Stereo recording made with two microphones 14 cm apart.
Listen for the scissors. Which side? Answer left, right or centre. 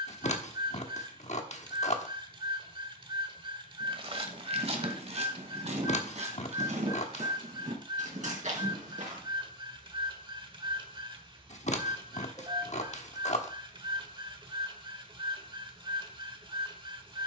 left.